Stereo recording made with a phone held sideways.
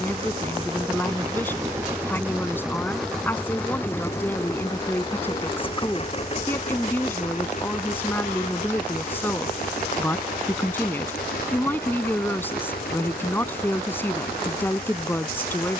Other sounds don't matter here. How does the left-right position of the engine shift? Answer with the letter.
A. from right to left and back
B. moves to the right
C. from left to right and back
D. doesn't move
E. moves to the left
E.